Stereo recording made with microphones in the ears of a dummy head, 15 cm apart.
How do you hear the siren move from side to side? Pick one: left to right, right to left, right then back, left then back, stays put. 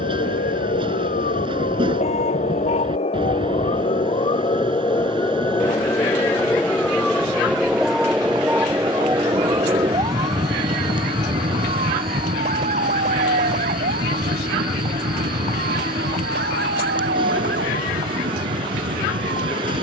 left to right.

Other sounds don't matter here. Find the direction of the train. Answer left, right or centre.
right.